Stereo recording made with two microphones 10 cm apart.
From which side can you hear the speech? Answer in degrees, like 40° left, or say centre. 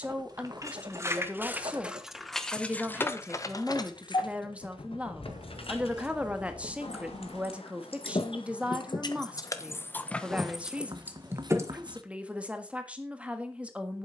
10° right.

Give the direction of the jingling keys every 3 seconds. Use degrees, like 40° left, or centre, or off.
10° right, 50° left, 70° left, 10° left, off.